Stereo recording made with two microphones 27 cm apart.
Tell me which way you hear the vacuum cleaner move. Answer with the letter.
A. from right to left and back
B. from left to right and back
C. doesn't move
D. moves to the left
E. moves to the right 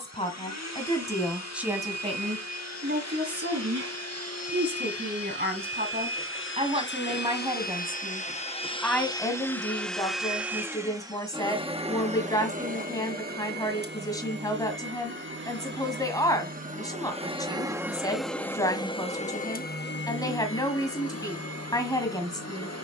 B.